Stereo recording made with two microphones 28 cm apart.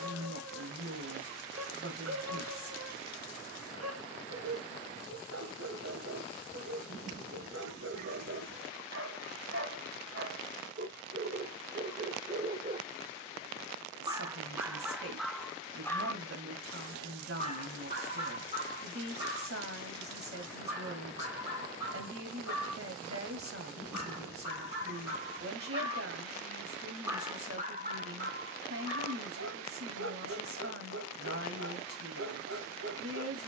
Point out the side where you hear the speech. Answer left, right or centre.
right.